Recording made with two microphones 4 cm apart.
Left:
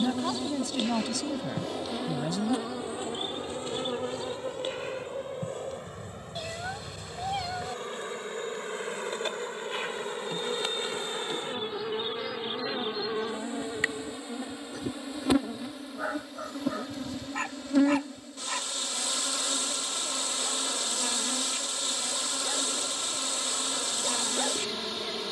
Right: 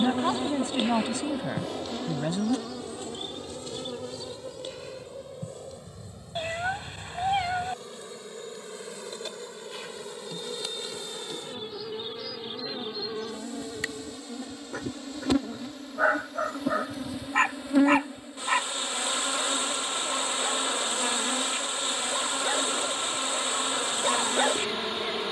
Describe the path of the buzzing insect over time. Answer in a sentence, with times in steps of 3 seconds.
You can hear the buzzing insect in the centre from 0 s, on the left from 3 s, in the centre from 15 s and on the right from 18 s.